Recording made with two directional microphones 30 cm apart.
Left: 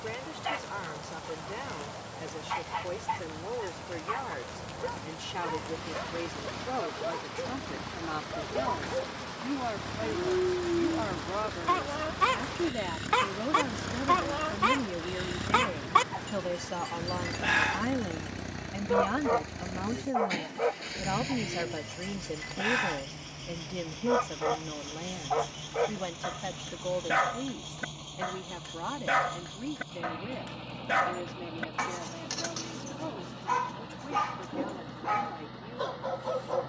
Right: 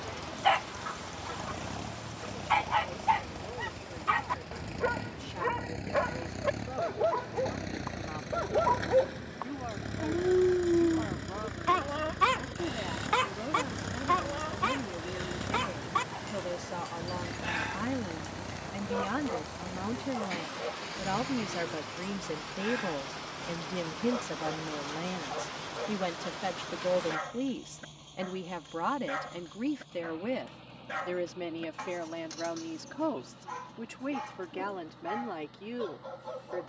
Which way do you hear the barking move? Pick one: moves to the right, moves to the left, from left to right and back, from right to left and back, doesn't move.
moves to the left.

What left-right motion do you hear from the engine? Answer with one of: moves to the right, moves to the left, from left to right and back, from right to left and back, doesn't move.
moves to the left.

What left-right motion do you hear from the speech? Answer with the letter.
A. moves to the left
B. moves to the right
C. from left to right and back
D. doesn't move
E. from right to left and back
B.